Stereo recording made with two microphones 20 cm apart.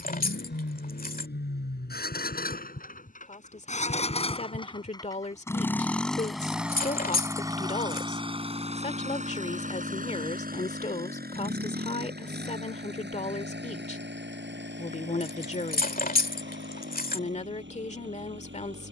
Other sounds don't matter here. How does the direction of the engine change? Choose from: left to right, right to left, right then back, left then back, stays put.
left to right.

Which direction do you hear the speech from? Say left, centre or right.
left.